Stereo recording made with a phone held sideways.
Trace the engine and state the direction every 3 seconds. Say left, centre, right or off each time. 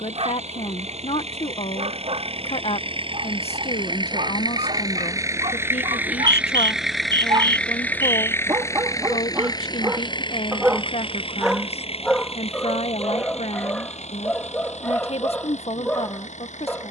right, right, centre, left, left, left.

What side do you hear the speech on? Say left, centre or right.
left.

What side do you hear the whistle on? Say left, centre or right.
right.